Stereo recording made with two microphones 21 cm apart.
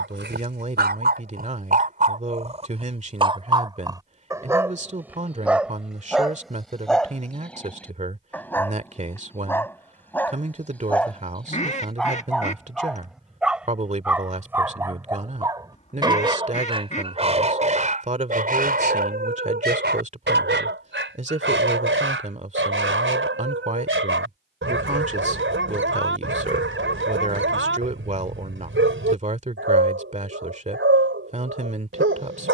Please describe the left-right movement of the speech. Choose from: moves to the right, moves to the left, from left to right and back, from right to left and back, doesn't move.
doesn't move.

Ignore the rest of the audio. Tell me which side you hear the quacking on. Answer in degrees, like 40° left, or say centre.
30° left.